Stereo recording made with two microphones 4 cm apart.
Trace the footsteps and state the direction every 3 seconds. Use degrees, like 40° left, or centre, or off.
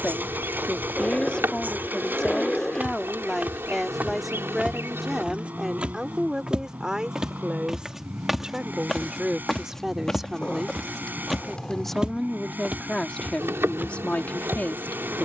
40° right, 30° right, 10° right, 10° left, 40° right.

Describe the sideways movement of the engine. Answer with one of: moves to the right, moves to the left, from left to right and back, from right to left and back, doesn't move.
doesn't move.